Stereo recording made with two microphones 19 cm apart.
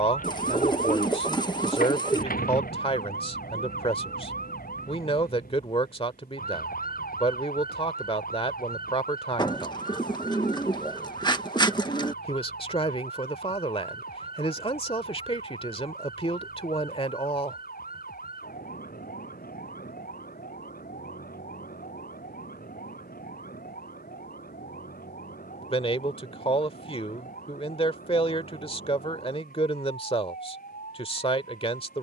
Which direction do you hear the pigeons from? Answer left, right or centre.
left.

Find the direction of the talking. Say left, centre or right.
left.